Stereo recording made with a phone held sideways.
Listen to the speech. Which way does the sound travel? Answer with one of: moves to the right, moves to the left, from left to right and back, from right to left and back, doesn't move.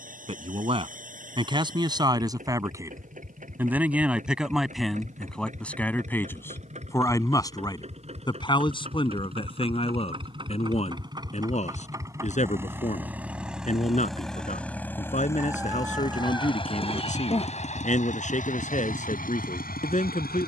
moves to the left.